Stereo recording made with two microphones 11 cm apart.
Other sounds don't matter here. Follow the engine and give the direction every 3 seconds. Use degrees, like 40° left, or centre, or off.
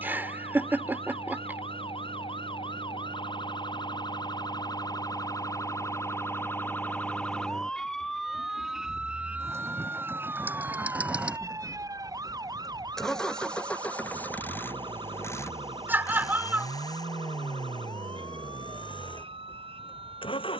50° right, 50° right, 40° right, 20° right, 10° left, 30° left, 50° left.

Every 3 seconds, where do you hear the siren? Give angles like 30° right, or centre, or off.
60° left, 40° left, 10° left, 20° right, 40° right, 50° right, 60° right.